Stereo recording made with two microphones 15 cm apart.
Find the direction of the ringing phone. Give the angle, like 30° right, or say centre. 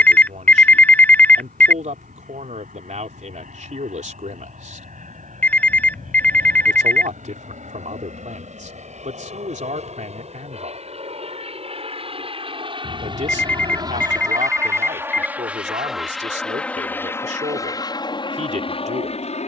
10° left.